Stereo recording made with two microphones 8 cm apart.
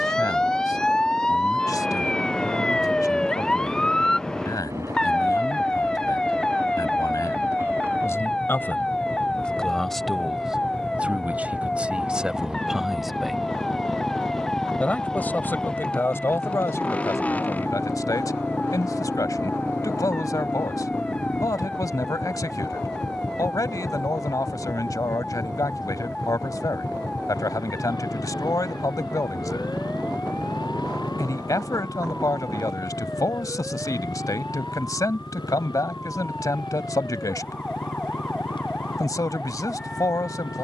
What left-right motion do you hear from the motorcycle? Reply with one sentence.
In this clip you hear the motorcycle travel towards the left.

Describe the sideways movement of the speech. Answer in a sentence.
In this clip you hear the speech go right and come back.